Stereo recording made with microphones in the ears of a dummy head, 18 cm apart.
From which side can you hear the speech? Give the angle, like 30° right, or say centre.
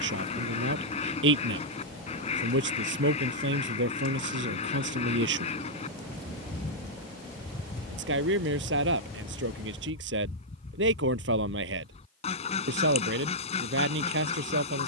70° right.